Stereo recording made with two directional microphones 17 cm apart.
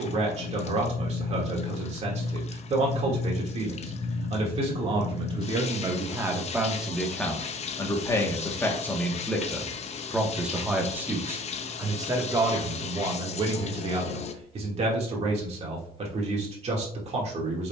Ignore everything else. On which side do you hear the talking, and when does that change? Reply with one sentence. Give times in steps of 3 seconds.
In this clip you hear the talking on the right from 0 s, in the centre from 6 s and on the right from 12 s.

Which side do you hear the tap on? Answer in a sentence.
You can hear the tap on the left.